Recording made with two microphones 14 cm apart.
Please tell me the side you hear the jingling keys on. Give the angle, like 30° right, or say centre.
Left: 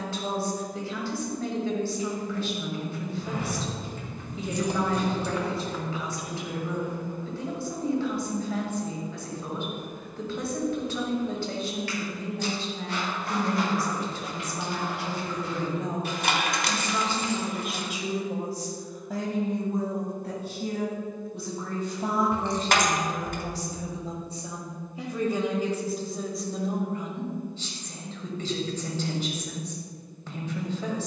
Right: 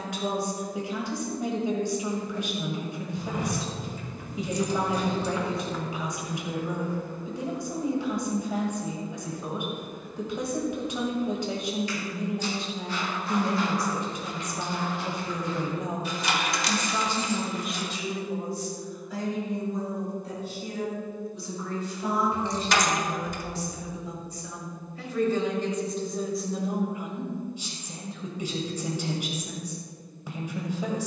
60° left.